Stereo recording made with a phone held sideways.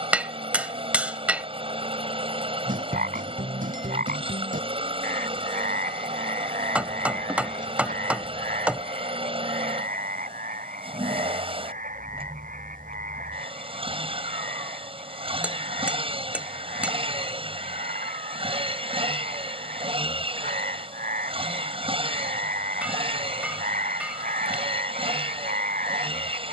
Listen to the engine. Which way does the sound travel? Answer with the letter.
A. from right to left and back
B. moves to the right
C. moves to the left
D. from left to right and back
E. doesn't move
E.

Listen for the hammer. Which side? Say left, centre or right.
centre.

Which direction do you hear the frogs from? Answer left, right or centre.
right.